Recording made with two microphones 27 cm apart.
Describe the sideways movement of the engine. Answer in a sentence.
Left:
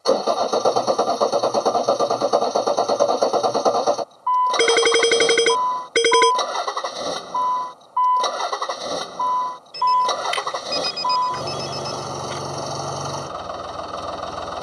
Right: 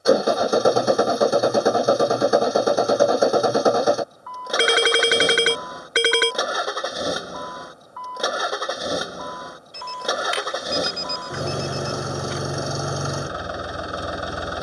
You can hear the engine stay in one place.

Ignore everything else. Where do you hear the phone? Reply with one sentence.
In this clip you hear the phone on the left.